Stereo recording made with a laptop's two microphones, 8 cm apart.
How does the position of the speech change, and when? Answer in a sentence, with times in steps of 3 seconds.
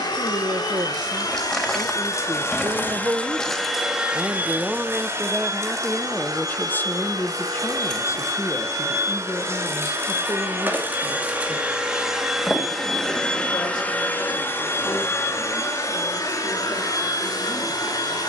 In this clip you hear the speech on the right from 0 s, in the centre from 3 s and on the left from 6 s.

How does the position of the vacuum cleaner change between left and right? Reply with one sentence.
You can hear the vacuum cleaner move from left to right and back again.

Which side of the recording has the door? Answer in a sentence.
In this clip you hear the door in the centre.